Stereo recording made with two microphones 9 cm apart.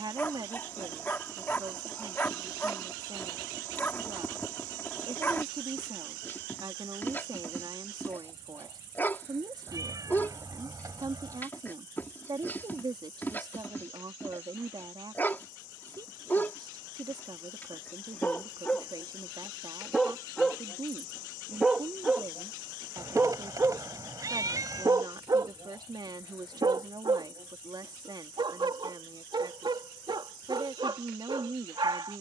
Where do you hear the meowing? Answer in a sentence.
In this clip you hear the meowing on the right.